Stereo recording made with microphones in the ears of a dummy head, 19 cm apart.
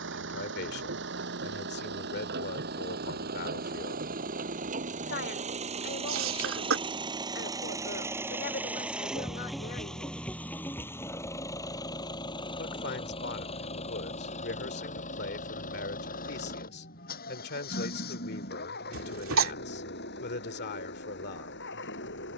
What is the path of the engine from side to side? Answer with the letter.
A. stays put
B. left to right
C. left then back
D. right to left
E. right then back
D.